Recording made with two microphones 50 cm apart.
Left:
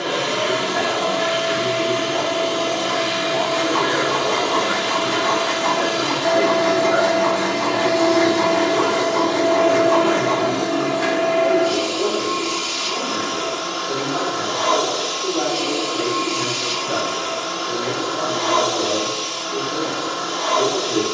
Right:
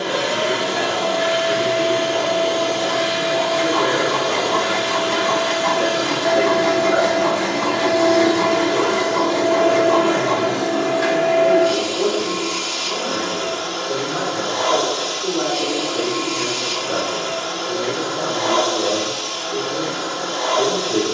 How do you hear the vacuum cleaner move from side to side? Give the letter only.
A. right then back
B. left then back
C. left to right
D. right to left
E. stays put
E.